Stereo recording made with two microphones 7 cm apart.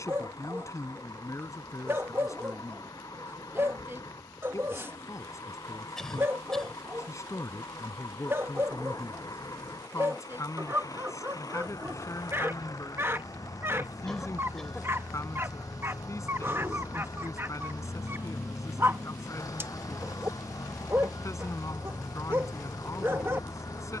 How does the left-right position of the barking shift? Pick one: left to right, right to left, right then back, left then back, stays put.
stays put.